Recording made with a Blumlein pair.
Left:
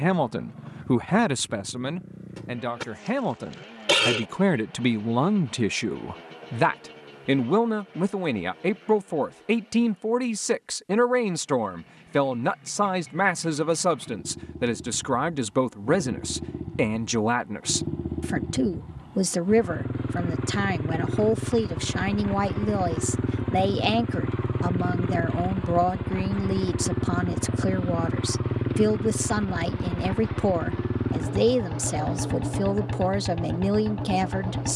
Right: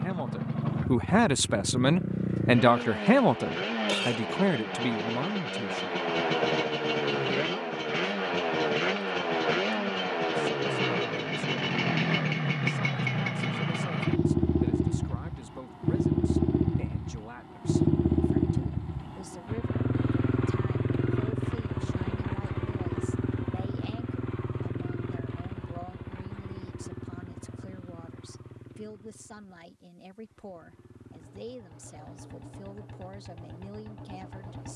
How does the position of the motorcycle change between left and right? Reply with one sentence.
You can hear the motorcycle move to the left.